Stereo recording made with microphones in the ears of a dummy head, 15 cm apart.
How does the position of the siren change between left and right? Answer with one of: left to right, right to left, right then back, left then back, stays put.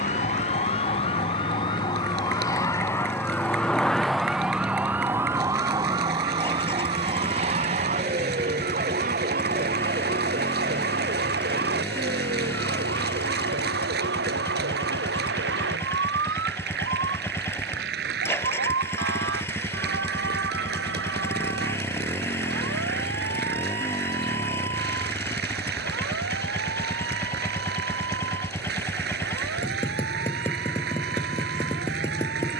left to right.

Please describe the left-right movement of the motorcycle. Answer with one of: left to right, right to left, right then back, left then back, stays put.
stays put.